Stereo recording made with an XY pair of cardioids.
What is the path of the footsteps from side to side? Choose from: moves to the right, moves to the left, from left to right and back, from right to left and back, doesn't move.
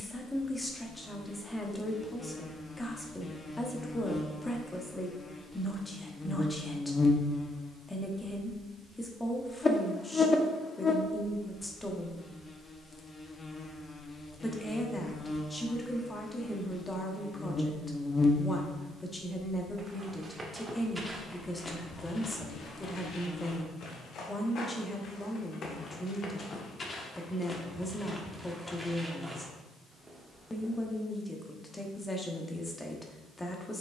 from right to left and back.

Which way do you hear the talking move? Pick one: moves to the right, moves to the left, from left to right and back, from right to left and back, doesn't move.
doesn't move.